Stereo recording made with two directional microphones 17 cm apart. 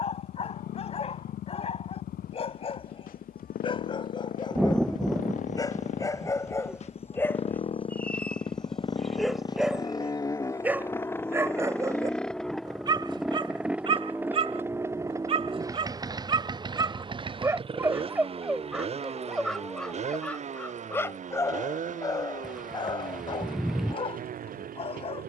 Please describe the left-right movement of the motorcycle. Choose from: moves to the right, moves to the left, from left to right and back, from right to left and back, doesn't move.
moves to the right.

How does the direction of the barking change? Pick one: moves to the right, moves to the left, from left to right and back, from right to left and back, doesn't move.
from left to right and back.